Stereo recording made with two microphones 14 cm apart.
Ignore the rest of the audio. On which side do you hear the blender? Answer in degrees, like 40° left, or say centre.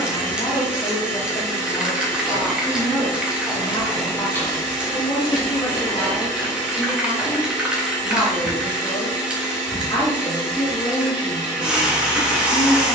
20° left.